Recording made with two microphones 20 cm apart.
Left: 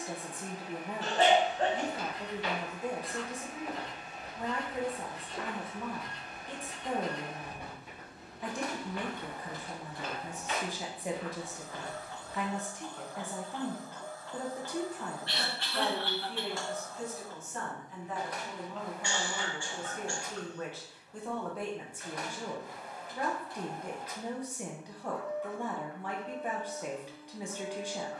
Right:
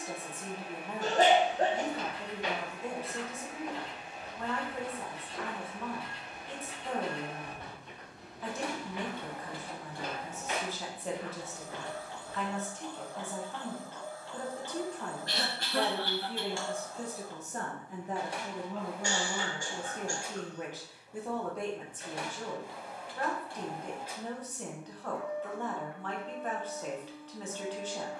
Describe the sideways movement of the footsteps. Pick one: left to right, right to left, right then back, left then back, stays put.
left then back.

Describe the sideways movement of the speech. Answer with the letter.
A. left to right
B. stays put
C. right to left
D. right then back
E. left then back
D.